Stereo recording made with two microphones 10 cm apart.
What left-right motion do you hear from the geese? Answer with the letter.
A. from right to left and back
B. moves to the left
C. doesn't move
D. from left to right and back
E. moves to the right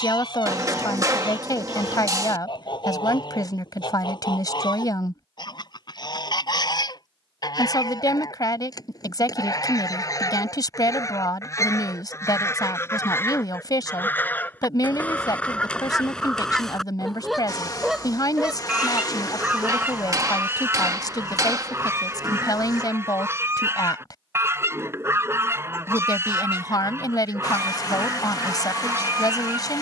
E.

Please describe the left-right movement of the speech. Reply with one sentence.
You can hear the speech stay in one place.